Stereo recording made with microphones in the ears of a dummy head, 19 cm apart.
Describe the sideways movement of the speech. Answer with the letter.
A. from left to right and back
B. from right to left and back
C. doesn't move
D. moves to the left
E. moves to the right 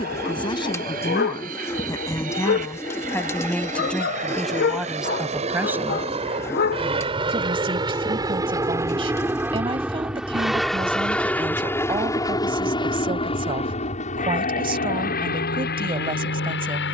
E.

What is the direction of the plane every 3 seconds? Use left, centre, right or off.
right, right, right, centre, left, left.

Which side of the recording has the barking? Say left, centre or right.
left.